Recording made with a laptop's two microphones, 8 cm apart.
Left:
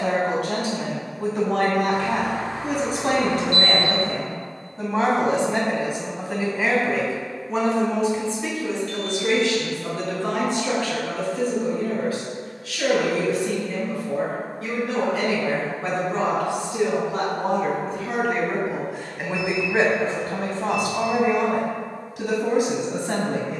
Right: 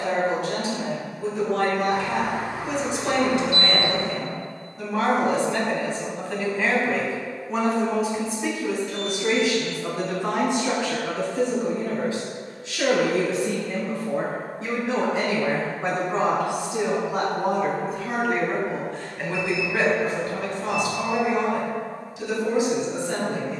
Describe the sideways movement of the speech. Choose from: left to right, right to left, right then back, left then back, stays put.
right then back.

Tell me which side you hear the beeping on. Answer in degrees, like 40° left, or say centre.
10° right.